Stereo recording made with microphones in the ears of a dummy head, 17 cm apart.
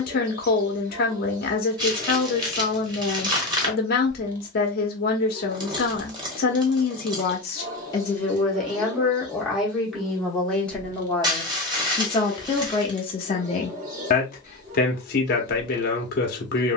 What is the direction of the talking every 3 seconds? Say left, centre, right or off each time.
left, left, left, centre, left, left.